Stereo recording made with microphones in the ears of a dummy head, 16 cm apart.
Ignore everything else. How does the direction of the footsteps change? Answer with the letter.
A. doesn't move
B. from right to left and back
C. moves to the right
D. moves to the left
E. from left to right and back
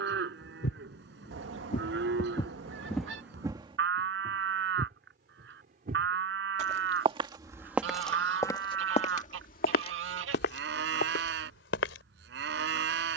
E.